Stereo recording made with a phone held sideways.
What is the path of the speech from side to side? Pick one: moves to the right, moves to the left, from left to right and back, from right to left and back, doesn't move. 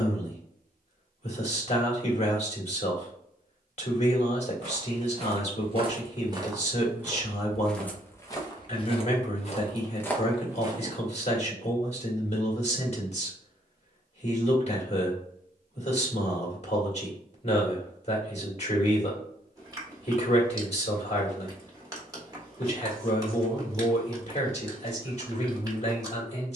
doesn't move.